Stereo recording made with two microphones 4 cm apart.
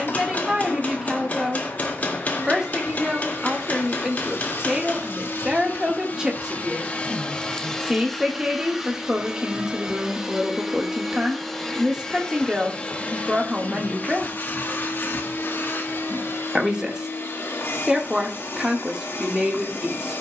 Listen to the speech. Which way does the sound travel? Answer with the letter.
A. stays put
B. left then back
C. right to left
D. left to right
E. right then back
A.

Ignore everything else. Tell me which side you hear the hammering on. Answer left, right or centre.
left.